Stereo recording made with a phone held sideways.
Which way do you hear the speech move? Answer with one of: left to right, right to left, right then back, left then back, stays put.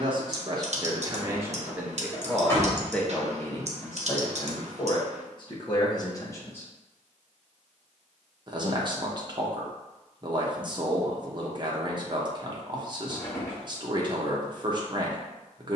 left then back.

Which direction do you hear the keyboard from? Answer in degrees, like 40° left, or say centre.
60° right.